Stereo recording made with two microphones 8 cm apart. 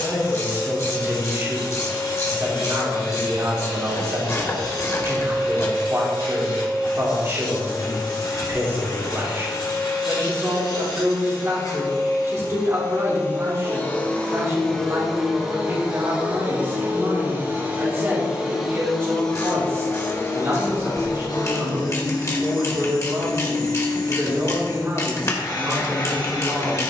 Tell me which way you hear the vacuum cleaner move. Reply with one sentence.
In this clip you hear the vacuum cleaner move from left to right and back again.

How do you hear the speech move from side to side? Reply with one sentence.
You can hear the speech stay put.